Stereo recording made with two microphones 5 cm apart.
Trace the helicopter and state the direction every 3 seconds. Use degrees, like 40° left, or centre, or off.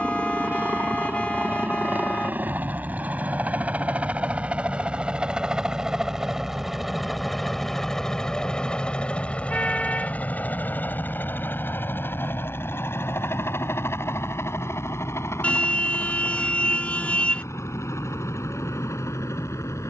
40° right, 20° right, 10° left, 40° left, 60° left, 70° left, 70° left.